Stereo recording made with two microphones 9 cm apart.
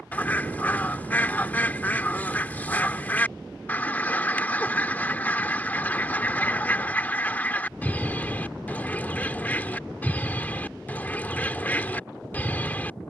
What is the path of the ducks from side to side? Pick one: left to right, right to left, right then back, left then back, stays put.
stays put.